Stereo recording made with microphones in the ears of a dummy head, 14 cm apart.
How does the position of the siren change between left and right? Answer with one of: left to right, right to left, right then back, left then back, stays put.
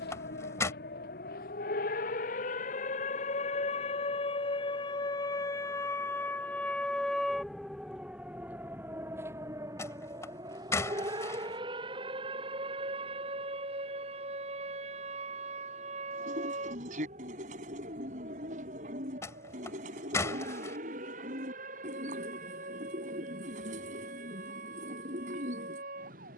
left to right.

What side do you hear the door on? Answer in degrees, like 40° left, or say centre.
20° left.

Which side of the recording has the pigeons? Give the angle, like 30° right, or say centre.
50° right.